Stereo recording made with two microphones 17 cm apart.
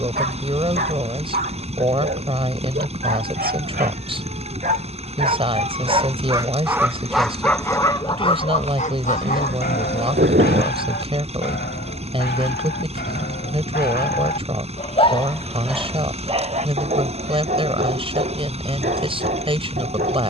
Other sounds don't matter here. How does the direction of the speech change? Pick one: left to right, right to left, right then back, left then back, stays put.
stays put.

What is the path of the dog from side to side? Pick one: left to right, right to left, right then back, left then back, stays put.
left then back.